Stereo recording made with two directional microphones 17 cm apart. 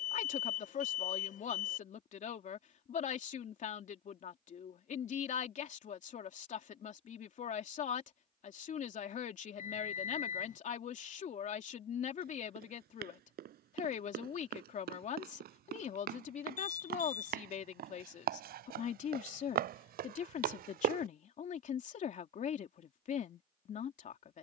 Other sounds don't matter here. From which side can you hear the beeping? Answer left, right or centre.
left.